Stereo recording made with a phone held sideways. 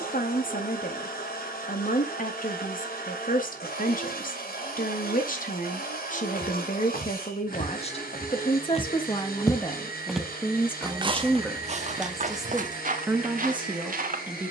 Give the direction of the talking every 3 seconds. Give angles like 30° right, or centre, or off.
60° left, 60° left, 50° left, 20° left, 10° right.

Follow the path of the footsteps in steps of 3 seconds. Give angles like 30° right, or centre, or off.
off, off, 60° left, 20° right, 60° right.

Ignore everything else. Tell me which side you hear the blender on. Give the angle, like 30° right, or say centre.
80° left.